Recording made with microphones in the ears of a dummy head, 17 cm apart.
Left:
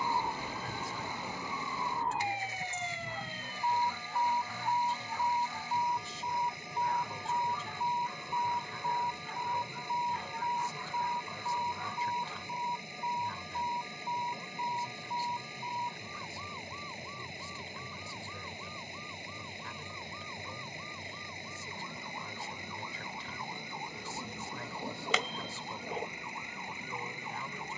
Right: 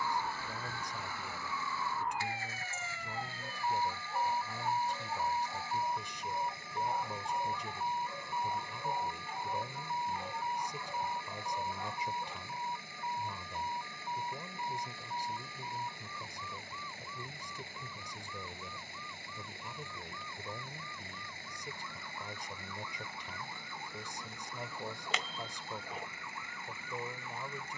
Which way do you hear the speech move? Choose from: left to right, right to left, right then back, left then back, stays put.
stays put.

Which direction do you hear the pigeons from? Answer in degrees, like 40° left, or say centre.
70° left.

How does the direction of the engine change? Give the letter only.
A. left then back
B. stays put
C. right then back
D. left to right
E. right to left
B.